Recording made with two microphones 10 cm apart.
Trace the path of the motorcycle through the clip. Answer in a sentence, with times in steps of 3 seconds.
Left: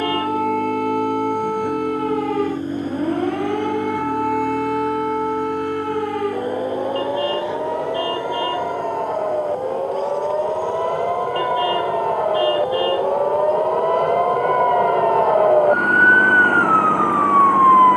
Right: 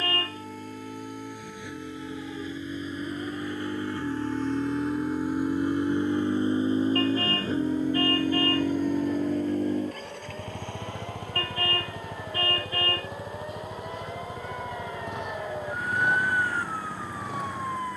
In this clip you hear the motorcycle on the left from 0 s, in the centre from 3 s and on the right from 6 s.